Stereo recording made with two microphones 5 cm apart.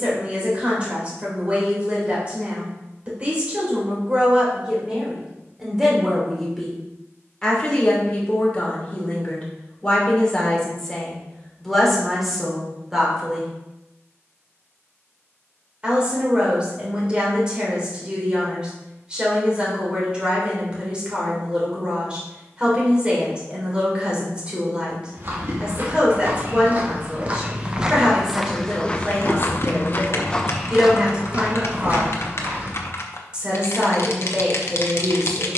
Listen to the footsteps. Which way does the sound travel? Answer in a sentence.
You can hear the footsteps go left and come back.